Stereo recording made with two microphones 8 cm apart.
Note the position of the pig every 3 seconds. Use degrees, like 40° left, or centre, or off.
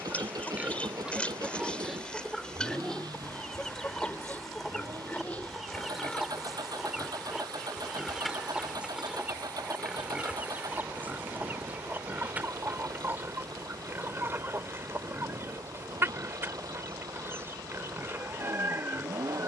10° right, 20° left, centre, 10° right, 30° right, 30° right, 30° right.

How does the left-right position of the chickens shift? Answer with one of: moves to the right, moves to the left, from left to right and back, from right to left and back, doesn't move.
moves to the right.